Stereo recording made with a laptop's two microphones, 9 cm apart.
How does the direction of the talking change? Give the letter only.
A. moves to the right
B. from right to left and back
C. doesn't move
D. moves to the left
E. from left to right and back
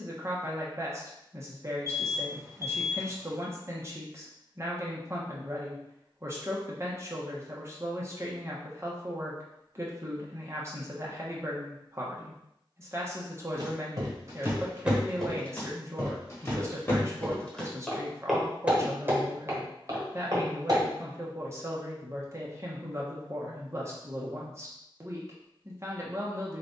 C.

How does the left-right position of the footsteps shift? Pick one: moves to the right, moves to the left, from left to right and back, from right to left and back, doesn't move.
from right to left and back.